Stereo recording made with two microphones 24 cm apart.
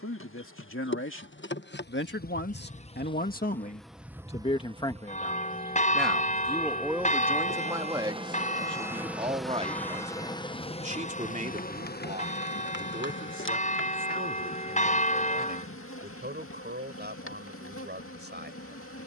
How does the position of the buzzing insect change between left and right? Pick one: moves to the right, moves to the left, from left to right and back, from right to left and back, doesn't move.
from left to right and back.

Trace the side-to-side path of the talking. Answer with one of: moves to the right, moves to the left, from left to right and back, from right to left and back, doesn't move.
moves to the right.